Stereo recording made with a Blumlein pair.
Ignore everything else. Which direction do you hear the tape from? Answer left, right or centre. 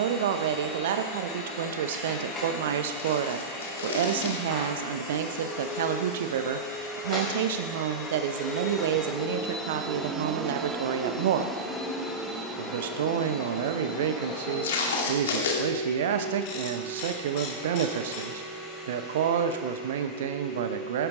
left.